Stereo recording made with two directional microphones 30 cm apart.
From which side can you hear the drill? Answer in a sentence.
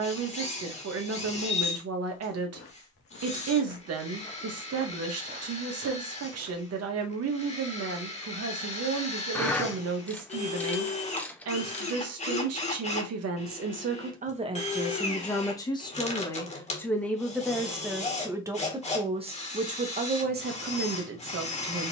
In this clip you hear the drill on the left.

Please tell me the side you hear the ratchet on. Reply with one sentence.
You can hear the ratchet in the centre.